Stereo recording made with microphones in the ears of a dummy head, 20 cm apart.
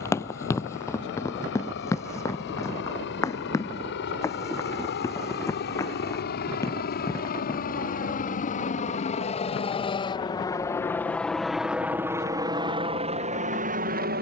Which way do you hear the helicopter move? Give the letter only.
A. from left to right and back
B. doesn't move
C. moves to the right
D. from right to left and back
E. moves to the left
C.